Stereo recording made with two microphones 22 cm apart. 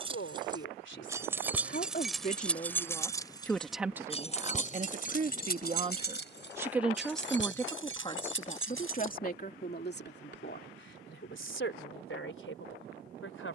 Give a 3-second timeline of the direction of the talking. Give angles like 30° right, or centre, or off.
50° left, 20° right, 10° left, 50° left, 60° left.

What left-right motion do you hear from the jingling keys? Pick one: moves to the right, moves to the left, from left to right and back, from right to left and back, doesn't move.
moves to the left.